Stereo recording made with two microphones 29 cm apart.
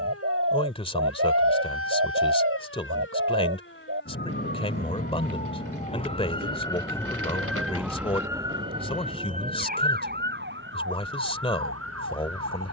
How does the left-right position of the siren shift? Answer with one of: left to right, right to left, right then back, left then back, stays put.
left to right.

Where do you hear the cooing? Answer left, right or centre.
right.